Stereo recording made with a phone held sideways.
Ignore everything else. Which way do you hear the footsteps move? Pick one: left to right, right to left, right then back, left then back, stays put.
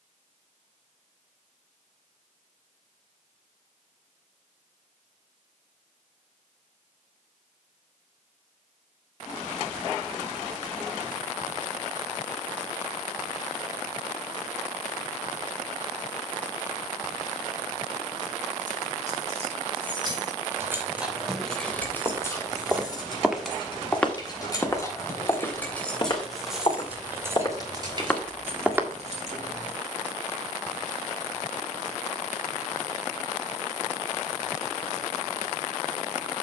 left then back.